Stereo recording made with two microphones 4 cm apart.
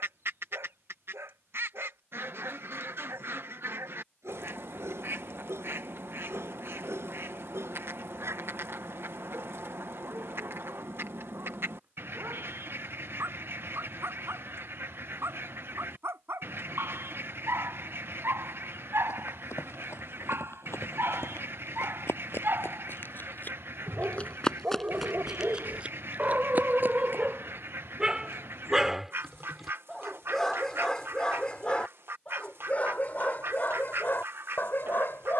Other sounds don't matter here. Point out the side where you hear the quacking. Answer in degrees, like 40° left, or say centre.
60° right.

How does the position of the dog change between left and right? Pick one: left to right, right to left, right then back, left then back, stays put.
right to left.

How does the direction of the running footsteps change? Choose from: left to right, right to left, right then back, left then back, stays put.
left to right.